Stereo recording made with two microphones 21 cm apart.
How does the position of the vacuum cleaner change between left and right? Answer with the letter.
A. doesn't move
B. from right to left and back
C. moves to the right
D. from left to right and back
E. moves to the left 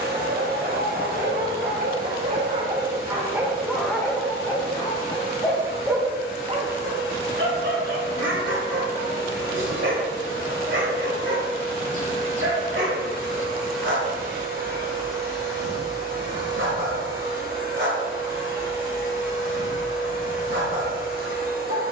A.